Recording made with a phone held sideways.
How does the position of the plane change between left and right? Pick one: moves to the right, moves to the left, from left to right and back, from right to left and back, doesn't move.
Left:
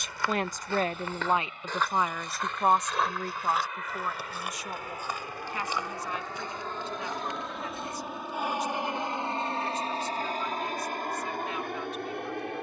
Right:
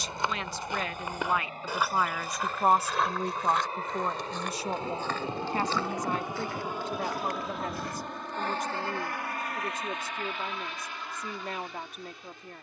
moves to the left.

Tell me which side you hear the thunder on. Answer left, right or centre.
right.